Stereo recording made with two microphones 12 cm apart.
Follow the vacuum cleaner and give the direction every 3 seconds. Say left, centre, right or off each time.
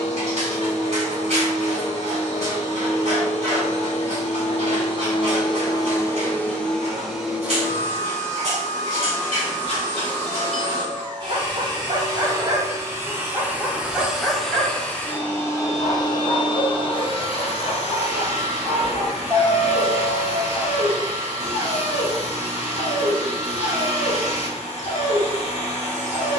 left, left, centre, right, centre, left, left, left, left.